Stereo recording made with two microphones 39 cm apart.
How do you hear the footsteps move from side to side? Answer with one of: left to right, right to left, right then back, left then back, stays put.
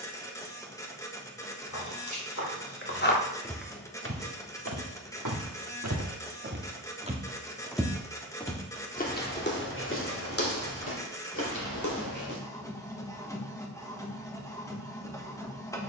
right then back.